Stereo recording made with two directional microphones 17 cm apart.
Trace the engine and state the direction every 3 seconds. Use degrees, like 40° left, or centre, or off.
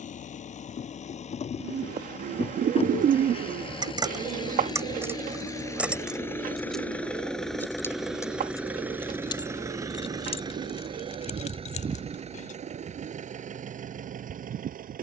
40° left, 30° left, centre, 20° right, 50° right.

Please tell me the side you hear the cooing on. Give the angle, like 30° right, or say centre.
50° right.